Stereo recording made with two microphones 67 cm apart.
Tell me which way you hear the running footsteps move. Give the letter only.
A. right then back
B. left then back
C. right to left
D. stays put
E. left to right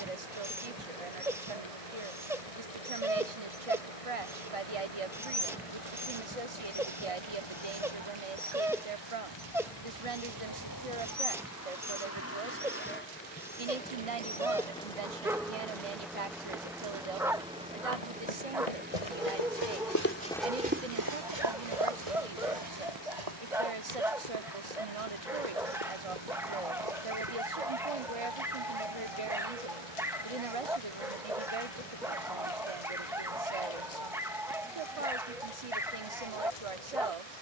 E.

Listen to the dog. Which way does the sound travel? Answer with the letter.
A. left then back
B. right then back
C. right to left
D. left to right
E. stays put
E.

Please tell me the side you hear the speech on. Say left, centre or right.
right.